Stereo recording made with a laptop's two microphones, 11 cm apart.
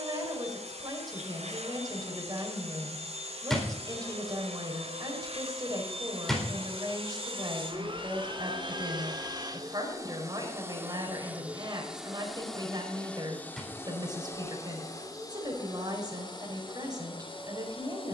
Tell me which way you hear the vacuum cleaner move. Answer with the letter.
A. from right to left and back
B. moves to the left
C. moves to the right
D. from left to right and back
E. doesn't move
B.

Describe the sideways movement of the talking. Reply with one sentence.
In this clip you hear the talking stay put.